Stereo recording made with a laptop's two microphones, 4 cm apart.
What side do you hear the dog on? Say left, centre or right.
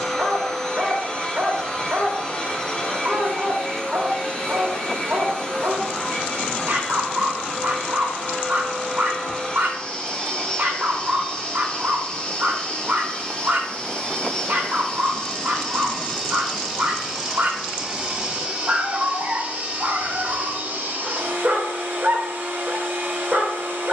right.